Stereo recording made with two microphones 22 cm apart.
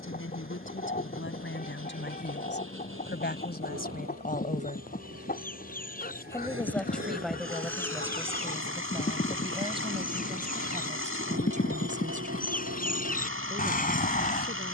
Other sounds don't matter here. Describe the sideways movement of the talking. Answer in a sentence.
In this clip you hear the talking travel towards the right.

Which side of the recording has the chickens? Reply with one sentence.
In this clip you hear the chickens on the left.